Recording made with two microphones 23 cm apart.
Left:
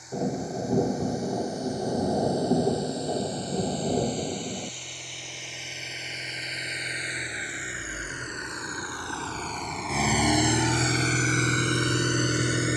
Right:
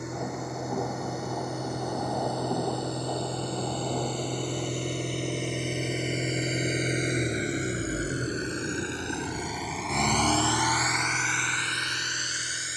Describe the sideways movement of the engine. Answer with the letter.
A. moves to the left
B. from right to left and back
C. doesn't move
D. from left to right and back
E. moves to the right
A.